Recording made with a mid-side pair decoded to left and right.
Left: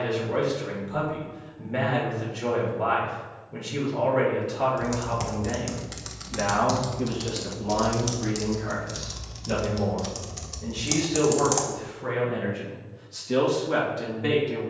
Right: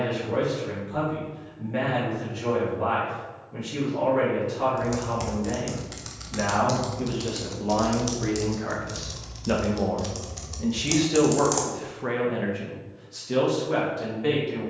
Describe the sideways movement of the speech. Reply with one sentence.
You can hear the speech go right and come back.